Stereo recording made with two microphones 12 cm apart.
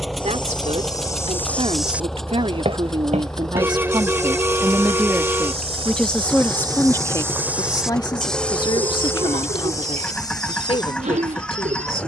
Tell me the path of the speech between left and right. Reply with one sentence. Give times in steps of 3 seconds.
You can hear the speech on the right from 0 s and on the left from 6 s.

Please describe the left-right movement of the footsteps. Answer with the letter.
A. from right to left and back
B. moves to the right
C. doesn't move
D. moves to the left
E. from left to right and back
E.